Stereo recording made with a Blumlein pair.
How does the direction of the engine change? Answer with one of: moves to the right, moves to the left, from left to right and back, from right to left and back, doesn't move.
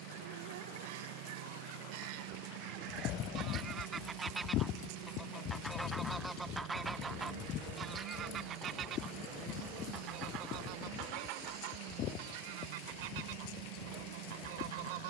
doesn't move.